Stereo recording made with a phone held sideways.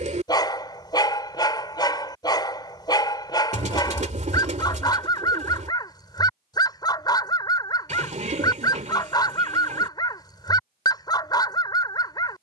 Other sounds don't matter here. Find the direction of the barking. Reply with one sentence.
In this clip you hear the barking on the left.